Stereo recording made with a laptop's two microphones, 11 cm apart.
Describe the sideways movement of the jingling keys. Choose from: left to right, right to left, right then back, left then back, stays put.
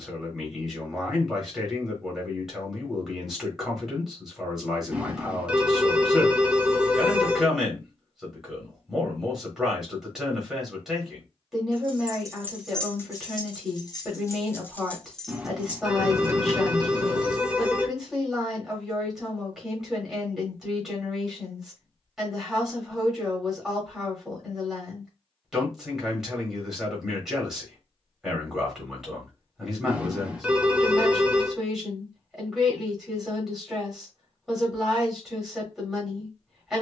left then back.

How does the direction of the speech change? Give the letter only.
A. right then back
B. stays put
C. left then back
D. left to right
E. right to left
B.